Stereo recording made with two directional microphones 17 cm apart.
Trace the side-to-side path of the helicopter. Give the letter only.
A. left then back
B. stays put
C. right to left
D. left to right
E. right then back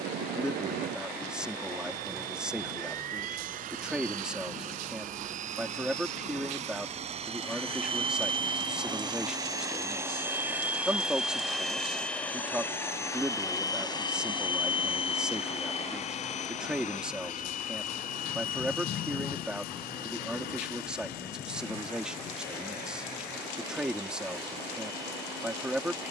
C.